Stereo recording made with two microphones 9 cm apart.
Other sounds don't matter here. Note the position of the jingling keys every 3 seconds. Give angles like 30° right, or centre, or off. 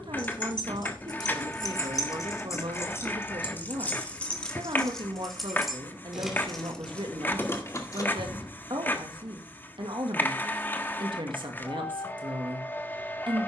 50° left, 10° left, 20° left, off, off.